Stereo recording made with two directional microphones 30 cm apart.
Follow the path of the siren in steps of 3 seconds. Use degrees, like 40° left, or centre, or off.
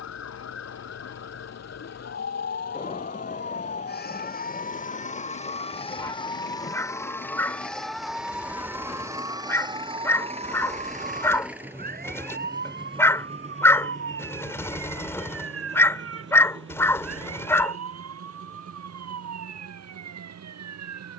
50° left, 30° left, centre, 20° right, 40° right, 50° right, 60° right.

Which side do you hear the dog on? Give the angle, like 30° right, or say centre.
10° left.